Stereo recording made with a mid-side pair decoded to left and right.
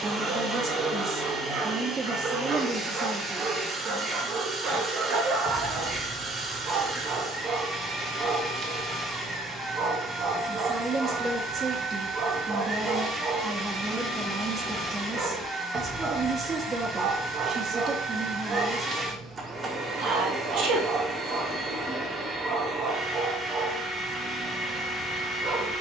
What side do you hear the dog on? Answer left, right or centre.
right.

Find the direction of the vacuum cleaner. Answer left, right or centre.
right.